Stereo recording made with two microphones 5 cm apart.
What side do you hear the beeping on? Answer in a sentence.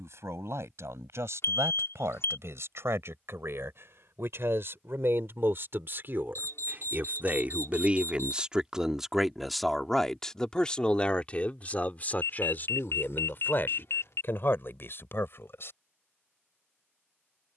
You can hear the beeping on the left.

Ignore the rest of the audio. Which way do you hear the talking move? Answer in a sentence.
You can hear the talking move to the left.